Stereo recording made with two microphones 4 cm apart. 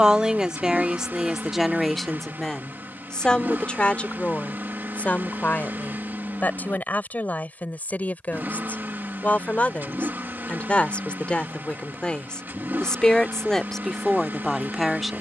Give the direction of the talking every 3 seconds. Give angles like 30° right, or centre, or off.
10° right, 30° left, 40° left, 30° left, 10° left.